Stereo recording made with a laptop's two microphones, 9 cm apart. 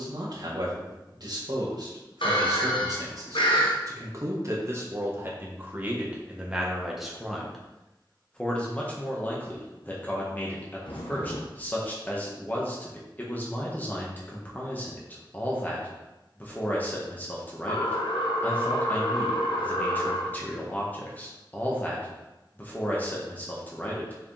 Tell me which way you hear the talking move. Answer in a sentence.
In this clip you hear the talking move to the left.